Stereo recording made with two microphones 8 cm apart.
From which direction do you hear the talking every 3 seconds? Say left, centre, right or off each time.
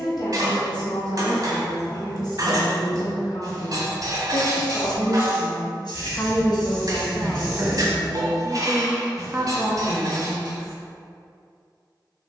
left, left, centre, right.